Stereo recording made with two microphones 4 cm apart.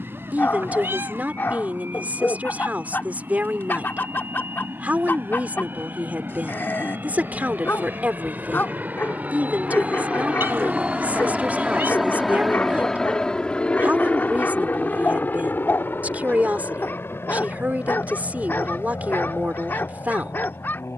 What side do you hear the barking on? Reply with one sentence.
You can hear the barking on the left.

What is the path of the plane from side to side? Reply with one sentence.
You can hear the plane move from right to left.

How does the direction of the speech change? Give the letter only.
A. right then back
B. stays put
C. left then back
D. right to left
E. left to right
B.